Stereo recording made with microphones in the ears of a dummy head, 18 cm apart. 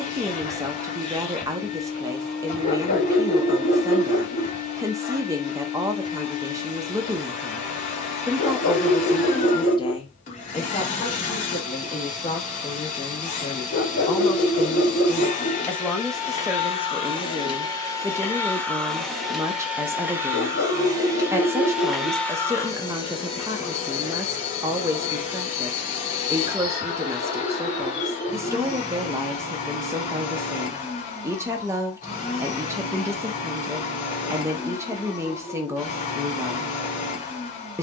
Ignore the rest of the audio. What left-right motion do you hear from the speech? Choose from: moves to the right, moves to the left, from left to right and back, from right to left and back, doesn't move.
from right to left and back.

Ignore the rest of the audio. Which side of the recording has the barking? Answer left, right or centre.
left.